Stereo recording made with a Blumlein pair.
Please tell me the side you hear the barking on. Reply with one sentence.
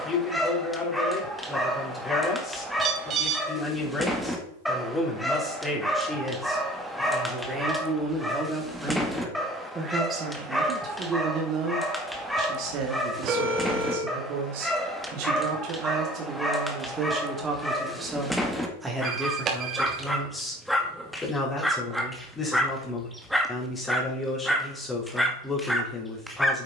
In this clip you hear the barking in the centre.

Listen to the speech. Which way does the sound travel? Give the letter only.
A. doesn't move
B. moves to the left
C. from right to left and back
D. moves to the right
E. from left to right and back
E.